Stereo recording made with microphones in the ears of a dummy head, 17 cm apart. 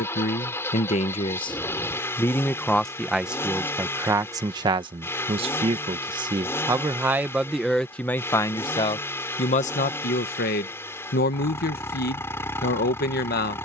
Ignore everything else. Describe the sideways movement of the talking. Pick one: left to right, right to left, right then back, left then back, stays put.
right then back.